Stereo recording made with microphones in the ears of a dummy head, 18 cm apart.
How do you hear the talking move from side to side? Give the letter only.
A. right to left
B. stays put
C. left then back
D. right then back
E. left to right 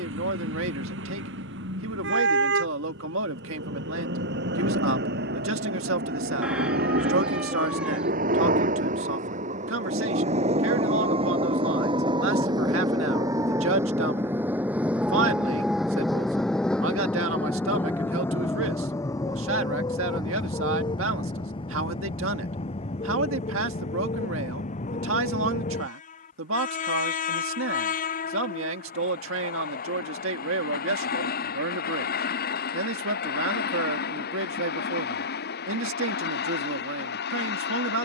B.